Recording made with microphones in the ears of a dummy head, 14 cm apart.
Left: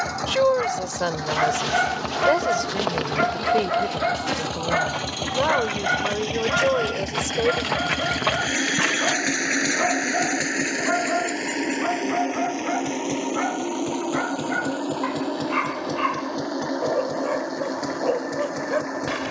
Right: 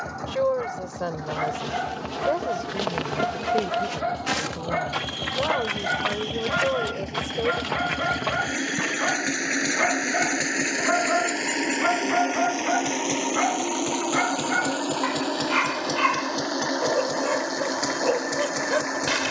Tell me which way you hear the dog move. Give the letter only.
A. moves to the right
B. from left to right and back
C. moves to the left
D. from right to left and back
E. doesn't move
A.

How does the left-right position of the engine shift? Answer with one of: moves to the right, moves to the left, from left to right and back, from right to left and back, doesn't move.
moves to the right.